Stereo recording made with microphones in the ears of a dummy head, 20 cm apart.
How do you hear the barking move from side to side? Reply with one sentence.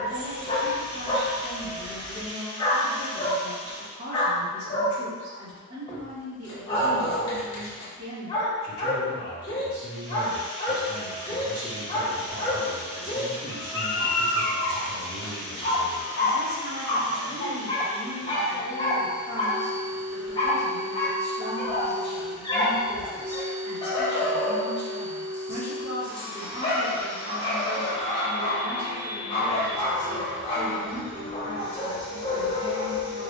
You can hear the barking stay in one place.